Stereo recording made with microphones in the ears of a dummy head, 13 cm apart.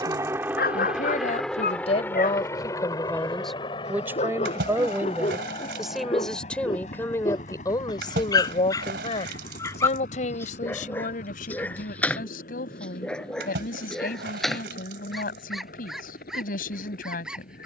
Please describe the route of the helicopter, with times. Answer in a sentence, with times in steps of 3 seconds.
You can hear the helicopter in the centre from 0 s and on the left from 3 s.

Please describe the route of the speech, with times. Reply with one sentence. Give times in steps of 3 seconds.
You can hear the speech on the left from 0 s, in the centre from 3 s and on the left from 6 s.